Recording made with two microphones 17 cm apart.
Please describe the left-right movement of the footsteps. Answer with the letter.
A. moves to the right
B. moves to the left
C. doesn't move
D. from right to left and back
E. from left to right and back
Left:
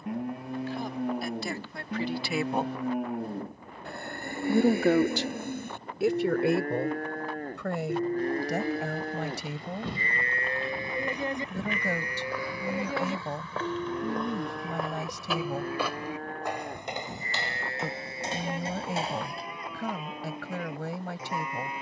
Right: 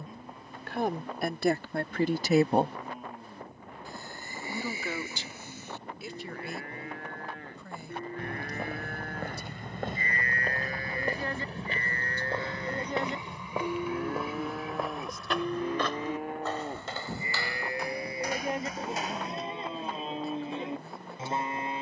B.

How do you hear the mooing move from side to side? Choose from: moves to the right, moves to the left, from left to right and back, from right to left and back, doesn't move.
moves to the right.